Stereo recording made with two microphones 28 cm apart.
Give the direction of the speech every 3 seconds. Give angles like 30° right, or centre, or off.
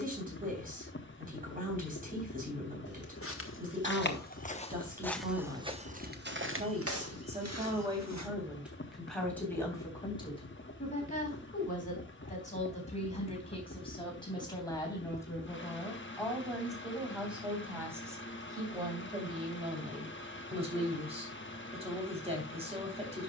30° right, 30° right, 20° right, 20° left, 20° left, centre, 20° right, 20° right.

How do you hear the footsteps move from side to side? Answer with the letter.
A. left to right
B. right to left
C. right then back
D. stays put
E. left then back
A.